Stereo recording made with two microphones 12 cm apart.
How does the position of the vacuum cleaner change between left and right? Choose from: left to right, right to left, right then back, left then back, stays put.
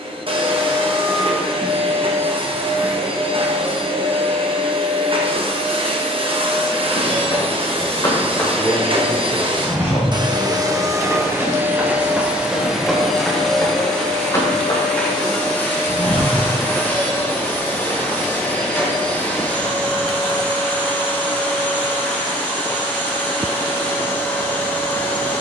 right to left.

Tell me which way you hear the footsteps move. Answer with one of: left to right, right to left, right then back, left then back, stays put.
right then back.